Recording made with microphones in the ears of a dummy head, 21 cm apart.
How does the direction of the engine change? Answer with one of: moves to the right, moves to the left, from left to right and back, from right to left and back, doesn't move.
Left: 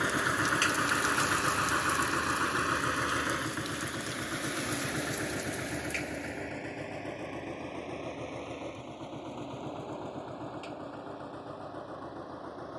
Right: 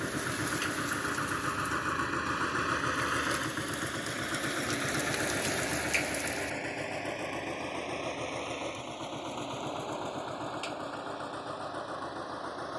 moves to the right.